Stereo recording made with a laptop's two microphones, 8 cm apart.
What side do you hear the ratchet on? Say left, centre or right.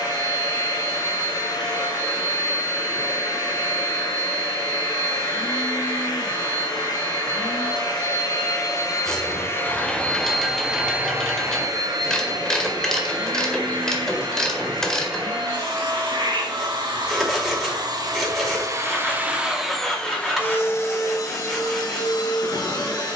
centre.